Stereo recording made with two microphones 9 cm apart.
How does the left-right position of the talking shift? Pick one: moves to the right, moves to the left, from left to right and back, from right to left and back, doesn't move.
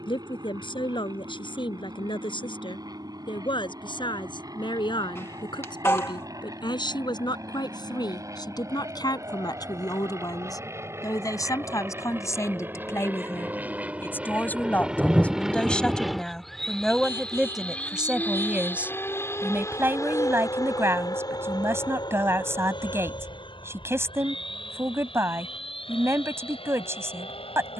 moves to the right.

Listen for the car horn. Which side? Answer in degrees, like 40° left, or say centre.
30° left.